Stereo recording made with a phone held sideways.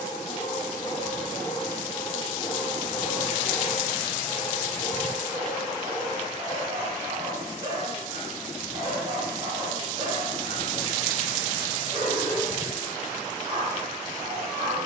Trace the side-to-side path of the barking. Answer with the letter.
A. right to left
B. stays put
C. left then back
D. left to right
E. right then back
D.